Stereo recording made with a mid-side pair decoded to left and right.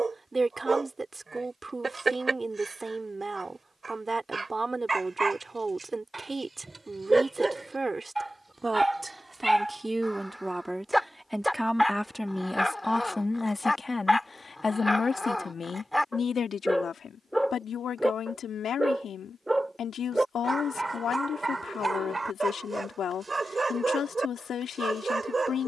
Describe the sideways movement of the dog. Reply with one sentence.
You can hear the dog move from right to left and back again.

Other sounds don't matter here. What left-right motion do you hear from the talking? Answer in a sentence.
In this clip you hear the talking move from right to left.